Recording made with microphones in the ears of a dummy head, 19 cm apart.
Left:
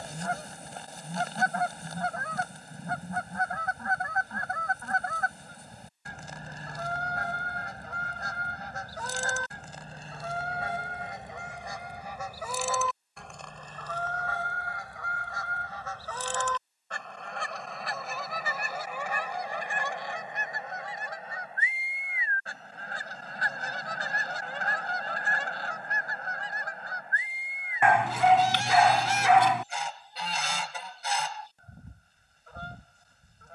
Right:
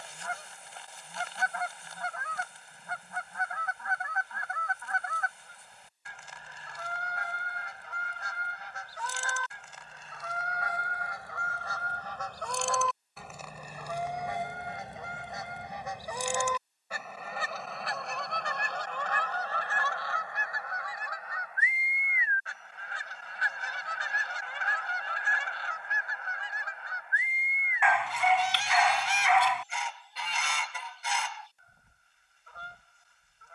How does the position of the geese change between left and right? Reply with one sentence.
In this clip you hear the geese go right and come back.